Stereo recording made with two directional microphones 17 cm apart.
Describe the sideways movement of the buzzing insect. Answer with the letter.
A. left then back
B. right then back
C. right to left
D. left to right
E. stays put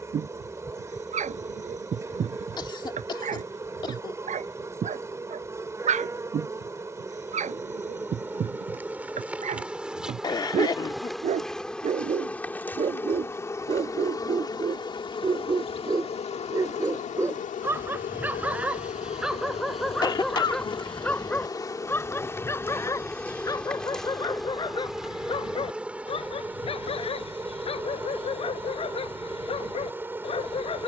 A.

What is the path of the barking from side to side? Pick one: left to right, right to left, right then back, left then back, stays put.
right to left.